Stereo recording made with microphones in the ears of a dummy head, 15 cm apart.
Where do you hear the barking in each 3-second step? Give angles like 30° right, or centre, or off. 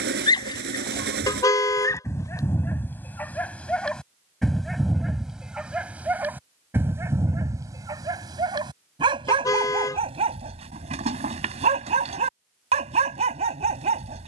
20° left, centre, 20° right, 40° right, 40° right.